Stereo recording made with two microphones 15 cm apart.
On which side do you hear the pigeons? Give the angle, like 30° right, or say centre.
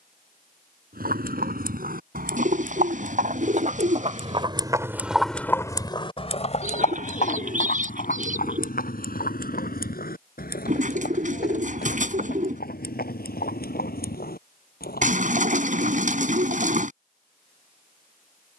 60° right.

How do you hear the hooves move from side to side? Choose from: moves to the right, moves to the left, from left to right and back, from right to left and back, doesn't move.
moves to the left.